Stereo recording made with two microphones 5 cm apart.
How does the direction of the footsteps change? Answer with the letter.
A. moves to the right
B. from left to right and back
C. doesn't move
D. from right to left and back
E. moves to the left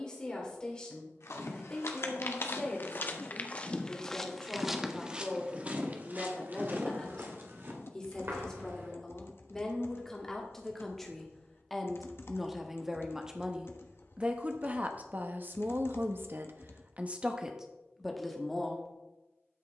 A.